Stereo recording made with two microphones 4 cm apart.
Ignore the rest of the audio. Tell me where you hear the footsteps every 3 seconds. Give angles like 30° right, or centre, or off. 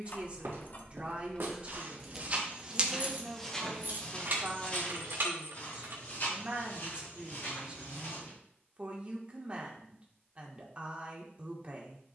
50° right, 30° left, 50° left, off.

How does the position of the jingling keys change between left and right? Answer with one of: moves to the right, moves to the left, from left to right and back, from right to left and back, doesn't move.
moves to the right.